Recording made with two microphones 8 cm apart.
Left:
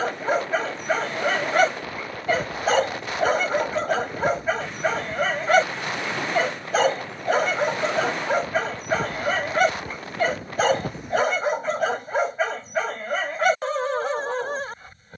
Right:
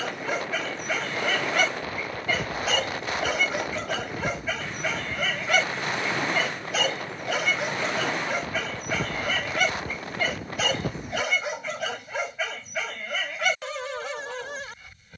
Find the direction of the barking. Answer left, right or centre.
left.